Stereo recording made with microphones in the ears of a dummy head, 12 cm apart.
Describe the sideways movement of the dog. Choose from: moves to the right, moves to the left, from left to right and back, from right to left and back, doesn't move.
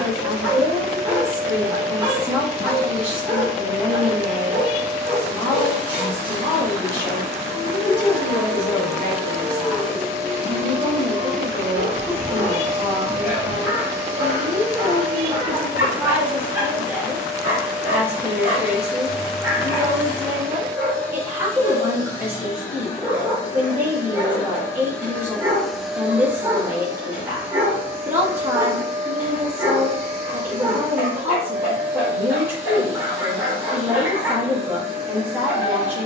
doesn't move.